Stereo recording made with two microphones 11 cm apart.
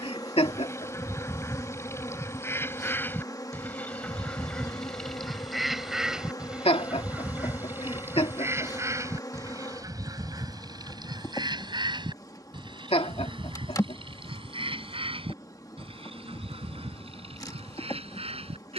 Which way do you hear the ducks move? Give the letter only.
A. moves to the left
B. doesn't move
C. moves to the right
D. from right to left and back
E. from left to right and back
C.